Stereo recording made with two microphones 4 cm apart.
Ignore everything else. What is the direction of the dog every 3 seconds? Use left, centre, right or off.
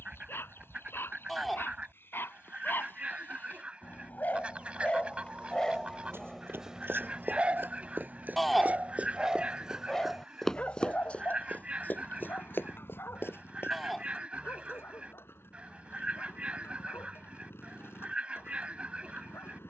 left, left, right, left, left, left, left.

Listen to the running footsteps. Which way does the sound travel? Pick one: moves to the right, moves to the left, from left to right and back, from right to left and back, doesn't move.
moves to the left.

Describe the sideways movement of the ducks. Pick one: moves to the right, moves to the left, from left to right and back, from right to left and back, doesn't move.
doesn't move.